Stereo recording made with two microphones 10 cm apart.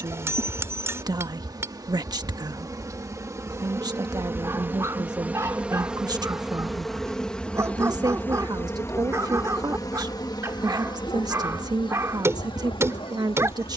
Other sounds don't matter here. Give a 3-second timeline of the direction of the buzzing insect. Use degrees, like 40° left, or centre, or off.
40° right, 20° right, 10° left, 40° left, 60° left.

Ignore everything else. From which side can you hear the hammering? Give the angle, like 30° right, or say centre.
30° right.